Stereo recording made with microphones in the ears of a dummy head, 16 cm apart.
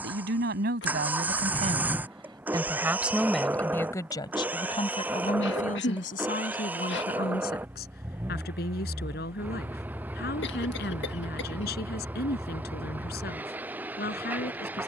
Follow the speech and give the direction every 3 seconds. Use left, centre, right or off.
right, left, left, left, left.